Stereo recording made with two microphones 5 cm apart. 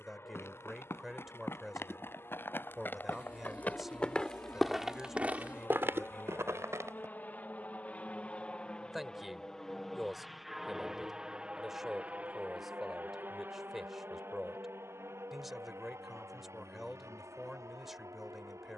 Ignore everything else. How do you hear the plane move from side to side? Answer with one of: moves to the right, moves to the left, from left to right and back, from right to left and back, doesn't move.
moves to the right.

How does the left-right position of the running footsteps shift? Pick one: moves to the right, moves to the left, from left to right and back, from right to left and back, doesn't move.
moves to the right.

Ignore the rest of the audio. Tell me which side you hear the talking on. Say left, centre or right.
centre.